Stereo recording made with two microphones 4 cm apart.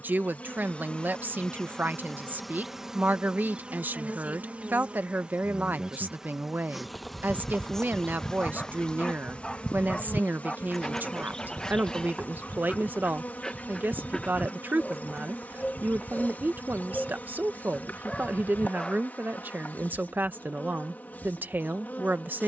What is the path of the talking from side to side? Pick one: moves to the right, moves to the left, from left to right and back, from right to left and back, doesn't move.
doesn't move.